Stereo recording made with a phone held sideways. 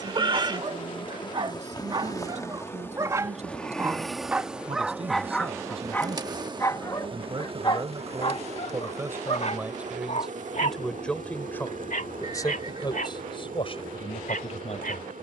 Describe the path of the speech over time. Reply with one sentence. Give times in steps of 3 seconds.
In this clip you hear the speech on the right from 0 s, in the centre from 9 s and on the left from 12 s.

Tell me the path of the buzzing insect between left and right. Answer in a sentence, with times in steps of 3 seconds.
You can hear the buzzing insect on the left from 0 s, in the centre from 3 s and on the right from 6 s.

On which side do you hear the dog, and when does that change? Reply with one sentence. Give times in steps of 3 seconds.
You can hear the dog on the right from 0 s, in the centre from 3 s and on the left from 6 s.